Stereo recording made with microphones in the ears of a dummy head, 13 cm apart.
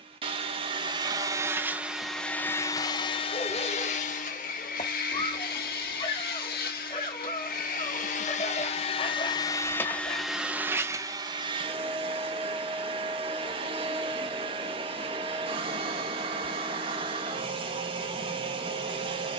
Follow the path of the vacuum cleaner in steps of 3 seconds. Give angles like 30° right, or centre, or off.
10° right, 60° left, 60° left, 10° right, 40° right, 40° right, 40° right.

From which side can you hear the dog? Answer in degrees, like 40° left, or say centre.
40° left.